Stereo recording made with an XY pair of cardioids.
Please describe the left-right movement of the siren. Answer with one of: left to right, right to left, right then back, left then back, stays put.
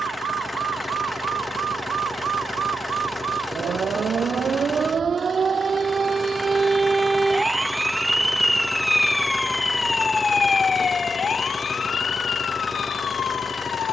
right to left.